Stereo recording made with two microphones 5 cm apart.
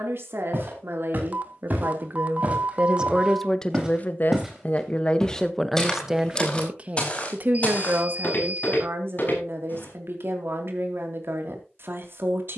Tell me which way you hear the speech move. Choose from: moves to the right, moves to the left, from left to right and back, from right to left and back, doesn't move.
from right to left and back.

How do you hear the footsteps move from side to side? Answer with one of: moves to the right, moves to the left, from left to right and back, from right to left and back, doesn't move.
moves to the left.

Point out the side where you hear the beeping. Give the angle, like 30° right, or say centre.
40° right.